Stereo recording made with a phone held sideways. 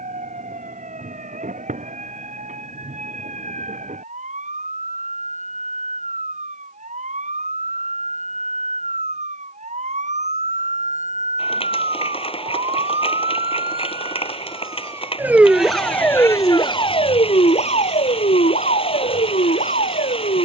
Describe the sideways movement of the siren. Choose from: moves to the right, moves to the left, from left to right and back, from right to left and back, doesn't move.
moves to the left.